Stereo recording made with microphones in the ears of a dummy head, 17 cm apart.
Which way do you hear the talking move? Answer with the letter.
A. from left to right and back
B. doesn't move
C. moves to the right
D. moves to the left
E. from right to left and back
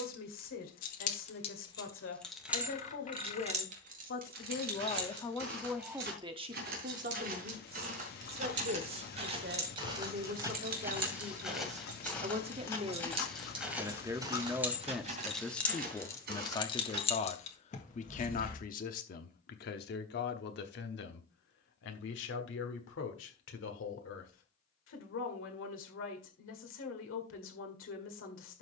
A.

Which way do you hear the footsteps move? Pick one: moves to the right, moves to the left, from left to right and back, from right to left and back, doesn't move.
from right to left and back.